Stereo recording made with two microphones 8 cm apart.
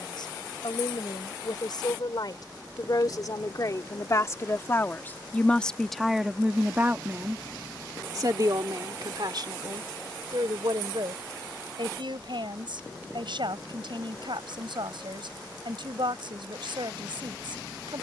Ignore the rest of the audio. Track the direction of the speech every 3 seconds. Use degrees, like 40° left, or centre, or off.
60° left, 30° left, 30° right, 70° right, 80° right, 80° right.